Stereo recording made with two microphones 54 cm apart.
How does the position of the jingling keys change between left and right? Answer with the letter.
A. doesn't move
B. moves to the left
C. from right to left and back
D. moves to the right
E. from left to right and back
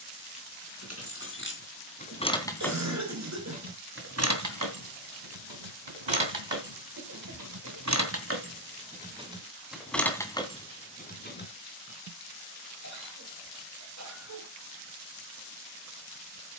E.